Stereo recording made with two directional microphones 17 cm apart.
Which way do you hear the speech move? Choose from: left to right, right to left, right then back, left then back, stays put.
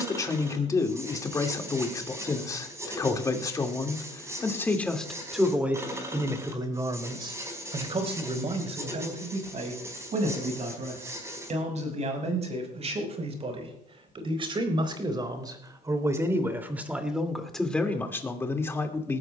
right then back.